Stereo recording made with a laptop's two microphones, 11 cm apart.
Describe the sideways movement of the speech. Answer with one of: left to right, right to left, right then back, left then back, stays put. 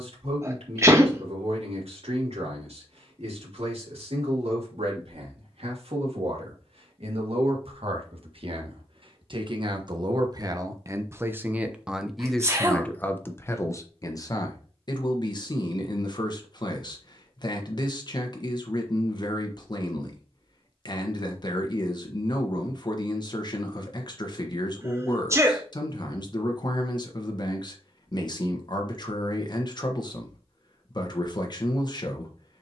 right to left.